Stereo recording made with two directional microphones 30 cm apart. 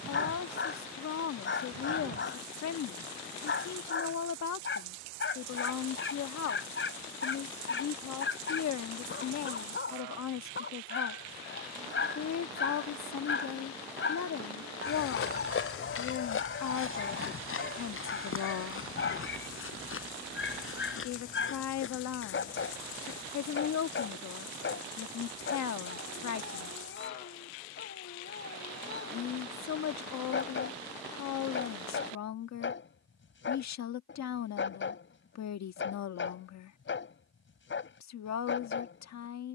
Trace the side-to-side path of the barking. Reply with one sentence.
You can hear the barking stay put.